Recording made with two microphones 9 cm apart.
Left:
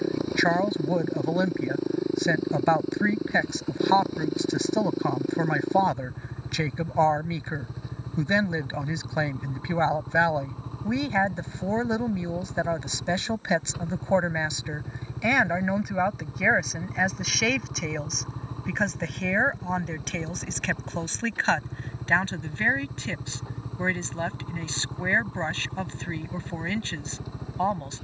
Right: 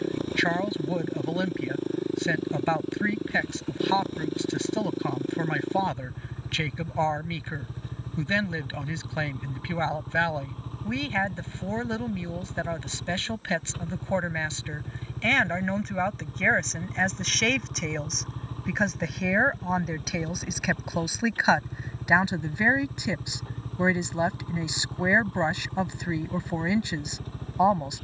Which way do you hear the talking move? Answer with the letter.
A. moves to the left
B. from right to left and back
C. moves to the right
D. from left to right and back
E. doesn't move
C.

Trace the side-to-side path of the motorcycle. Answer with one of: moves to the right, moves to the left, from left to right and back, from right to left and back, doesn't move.
doesn't move.